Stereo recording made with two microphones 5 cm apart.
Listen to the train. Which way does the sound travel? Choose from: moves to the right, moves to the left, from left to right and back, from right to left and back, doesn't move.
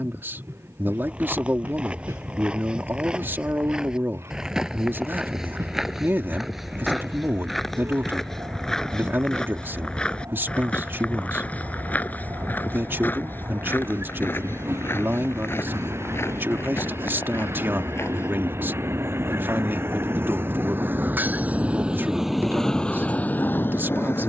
moves to the left.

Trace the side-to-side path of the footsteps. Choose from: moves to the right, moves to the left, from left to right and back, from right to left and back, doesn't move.
moves to the left.